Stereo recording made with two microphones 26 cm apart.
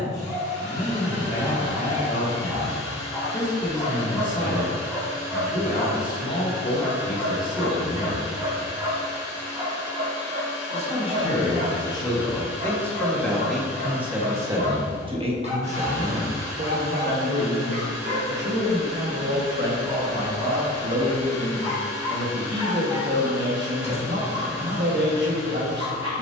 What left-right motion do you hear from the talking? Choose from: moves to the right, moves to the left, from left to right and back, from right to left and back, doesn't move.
moves to the right.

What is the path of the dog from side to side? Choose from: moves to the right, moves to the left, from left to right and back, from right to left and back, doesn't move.
from left to right and back.